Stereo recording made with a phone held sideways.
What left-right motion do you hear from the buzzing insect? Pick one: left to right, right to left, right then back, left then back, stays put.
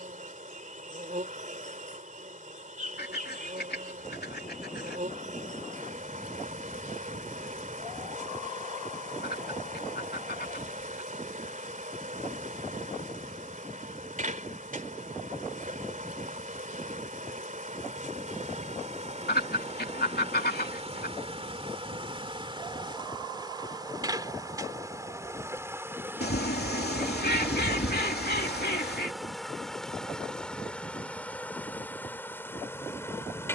right to left.